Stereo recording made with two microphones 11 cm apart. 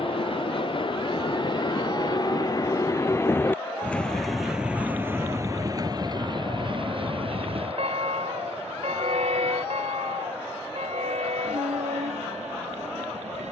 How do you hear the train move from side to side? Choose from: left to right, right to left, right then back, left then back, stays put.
left to right.